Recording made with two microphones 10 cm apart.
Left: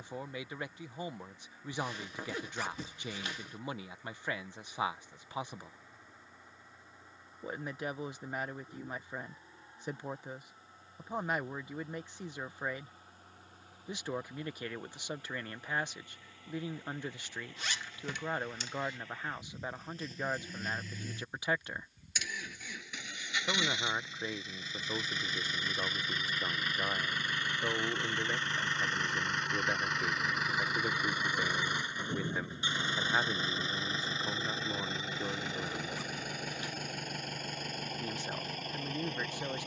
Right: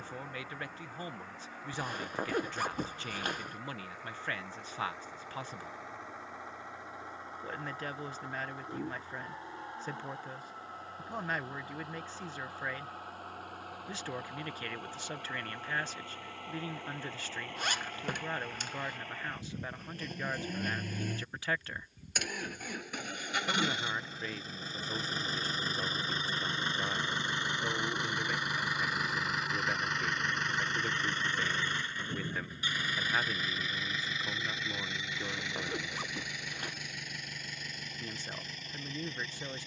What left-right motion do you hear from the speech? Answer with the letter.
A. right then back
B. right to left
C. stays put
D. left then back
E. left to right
C.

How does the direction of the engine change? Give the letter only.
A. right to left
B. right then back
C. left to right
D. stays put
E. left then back
A.